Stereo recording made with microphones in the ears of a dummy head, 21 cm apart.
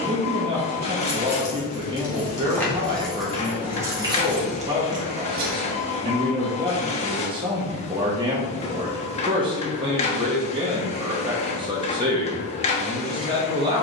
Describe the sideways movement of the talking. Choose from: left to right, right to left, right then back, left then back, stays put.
stays put.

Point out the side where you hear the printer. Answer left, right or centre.
left.